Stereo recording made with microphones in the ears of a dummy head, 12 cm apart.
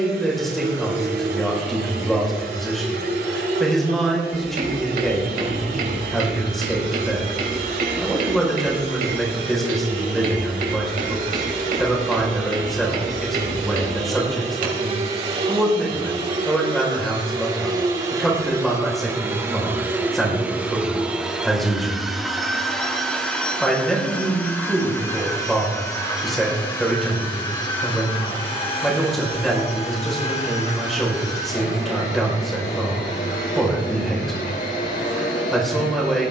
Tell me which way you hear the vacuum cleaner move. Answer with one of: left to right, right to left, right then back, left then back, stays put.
right to left.